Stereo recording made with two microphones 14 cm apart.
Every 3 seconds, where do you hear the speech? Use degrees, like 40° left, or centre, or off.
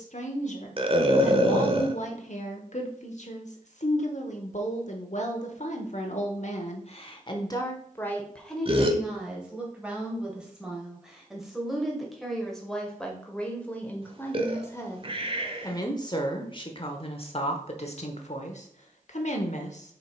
60° left, 60° left, 30° left, centre, 10° left, 40° left, 50° left.